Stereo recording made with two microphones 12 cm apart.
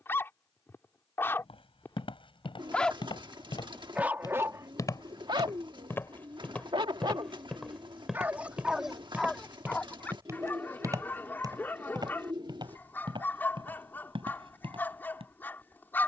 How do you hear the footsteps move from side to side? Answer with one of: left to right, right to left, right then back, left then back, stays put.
left to right.